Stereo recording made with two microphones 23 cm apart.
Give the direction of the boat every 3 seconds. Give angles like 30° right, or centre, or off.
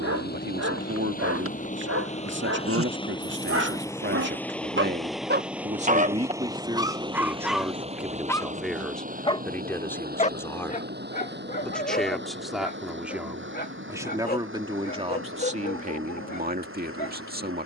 30° left, 10° left, 20° right, 40° right, 50° right, 60° right.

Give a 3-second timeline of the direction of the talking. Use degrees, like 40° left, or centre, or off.
50° right, 50° right, 10° right, 10° left, 10° right, 40° right.